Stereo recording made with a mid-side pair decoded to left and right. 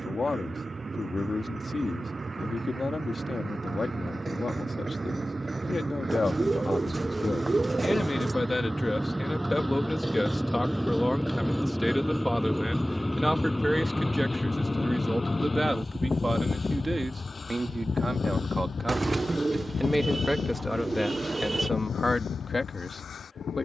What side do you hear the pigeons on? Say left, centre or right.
right.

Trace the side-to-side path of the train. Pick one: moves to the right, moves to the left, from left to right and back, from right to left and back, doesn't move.
moves to the left.